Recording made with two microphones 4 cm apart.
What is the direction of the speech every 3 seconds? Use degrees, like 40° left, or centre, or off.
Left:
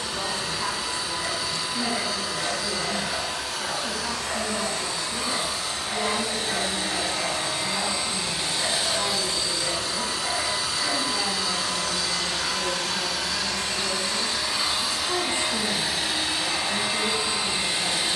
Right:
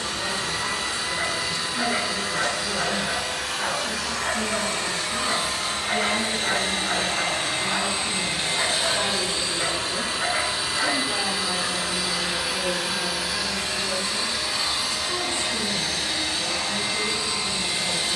30° left, 10° left, 10° right, 30° right, centre, 20° left.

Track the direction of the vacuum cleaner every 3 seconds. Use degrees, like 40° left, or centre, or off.
70° right, 70° right, 50° right, 30° right, 10° right, 10° left.